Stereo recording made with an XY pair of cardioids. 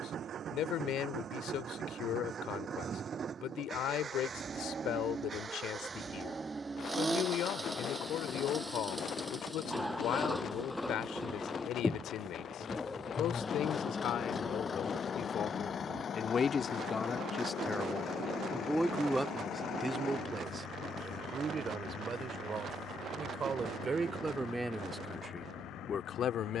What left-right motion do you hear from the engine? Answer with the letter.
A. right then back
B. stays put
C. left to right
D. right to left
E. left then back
D.